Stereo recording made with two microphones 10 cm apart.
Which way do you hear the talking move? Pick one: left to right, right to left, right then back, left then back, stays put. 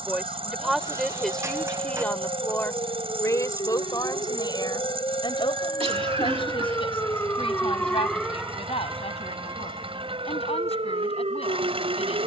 right to left.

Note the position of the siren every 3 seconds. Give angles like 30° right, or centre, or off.
60° left, 50° left, 10° left, 50° right.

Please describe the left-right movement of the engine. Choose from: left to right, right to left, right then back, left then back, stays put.
stays put.